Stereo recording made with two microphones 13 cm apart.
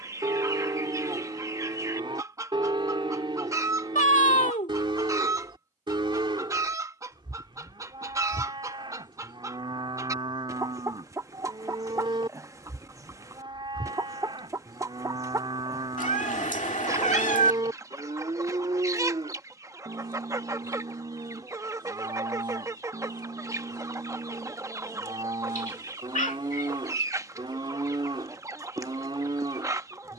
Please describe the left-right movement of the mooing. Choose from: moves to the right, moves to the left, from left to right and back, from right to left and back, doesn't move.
doesn't move.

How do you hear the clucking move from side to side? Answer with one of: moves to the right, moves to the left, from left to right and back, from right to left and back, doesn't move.
doesn't move.